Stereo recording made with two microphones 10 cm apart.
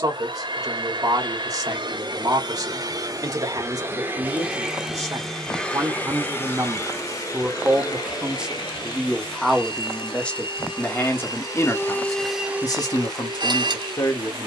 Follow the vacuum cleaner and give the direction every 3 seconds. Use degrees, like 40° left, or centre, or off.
50° right, 10° right, 40° left, 50° left, 30° right.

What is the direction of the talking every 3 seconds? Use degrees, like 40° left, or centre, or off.
40° right, 40° right, 20° right, 20° left, 40° left.